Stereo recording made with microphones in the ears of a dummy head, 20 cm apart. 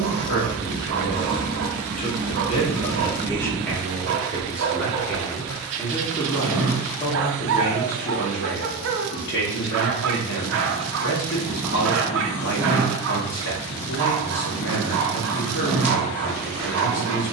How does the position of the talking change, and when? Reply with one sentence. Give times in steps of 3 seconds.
You can hear the talking on the left from 0 s, in the centre from 3 s and on the left from 6 s.